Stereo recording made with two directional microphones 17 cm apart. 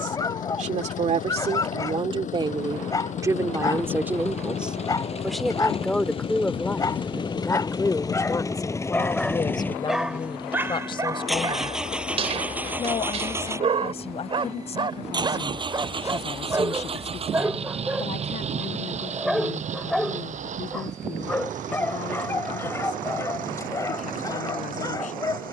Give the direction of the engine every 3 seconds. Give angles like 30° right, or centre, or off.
50° left, 40° left, 30° left, 10° left, 20° right, 30° right, 50° right, 50° right, 60° right.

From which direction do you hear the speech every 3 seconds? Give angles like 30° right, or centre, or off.
40° right, 10° right, 20° left, 30° left, 40° left, 40° left, 50° left, 50° left, 50° left.